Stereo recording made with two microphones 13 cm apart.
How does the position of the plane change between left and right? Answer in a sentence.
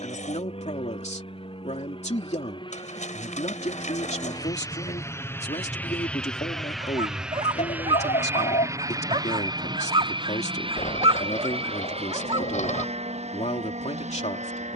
In this clip you hear the plane go from the left side to the right.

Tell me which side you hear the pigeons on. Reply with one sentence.
In this clip you hear the pigeons on the left.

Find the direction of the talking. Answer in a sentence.
In this clip you hear the talking on the left.